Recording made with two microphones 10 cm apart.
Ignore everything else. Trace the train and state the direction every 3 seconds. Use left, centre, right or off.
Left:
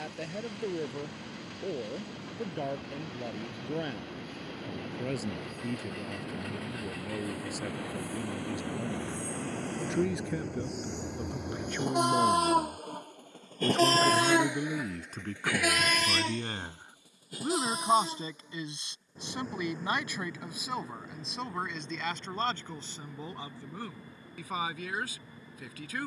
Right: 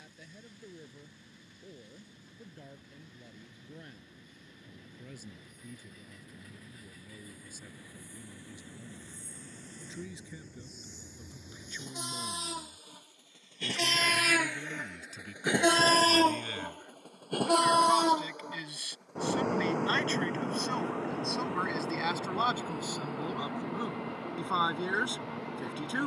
left, left, left, left, left, right, right, right, right.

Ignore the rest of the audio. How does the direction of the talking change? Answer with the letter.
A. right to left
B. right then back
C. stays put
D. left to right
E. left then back
D.